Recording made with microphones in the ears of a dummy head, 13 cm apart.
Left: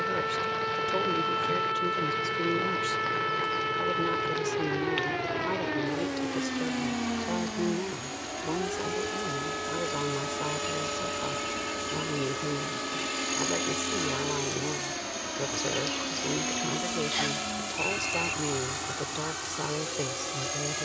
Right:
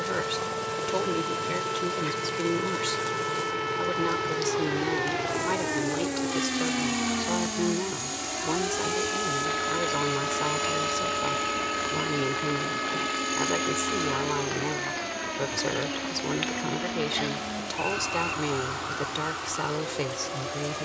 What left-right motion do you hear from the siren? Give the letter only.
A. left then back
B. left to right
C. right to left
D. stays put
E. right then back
B.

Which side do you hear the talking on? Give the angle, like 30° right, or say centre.
20° right.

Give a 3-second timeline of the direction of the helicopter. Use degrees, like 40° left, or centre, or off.
50° right, 40° right, 30° right, 10° right, 10° left, 30° left, 50° left.